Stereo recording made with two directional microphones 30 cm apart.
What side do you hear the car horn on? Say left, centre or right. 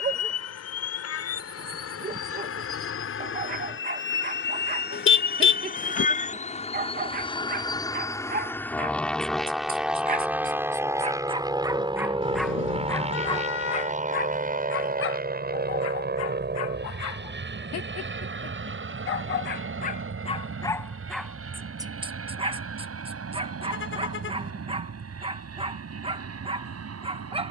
left.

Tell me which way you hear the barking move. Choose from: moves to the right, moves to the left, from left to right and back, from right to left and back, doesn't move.
from right to left and back.